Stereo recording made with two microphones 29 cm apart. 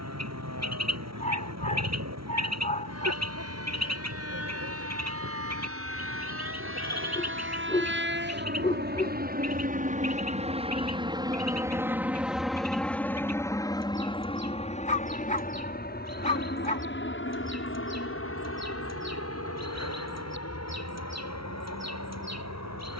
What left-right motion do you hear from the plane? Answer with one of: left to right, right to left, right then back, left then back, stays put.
right to left.